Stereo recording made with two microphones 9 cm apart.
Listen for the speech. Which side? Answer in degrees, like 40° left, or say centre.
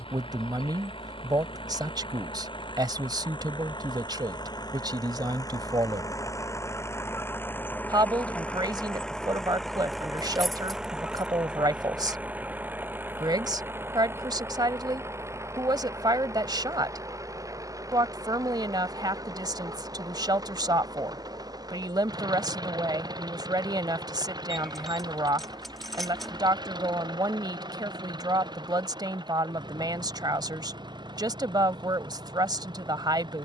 50° right.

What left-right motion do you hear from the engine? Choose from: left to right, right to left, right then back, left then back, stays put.
left to right.